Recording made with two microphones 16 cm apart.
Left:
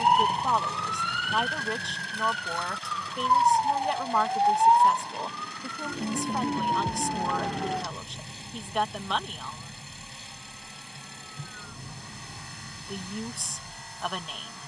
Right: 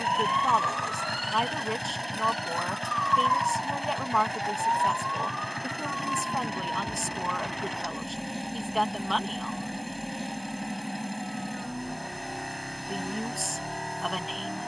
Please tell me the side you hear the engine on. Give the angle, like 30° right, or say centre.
70° right.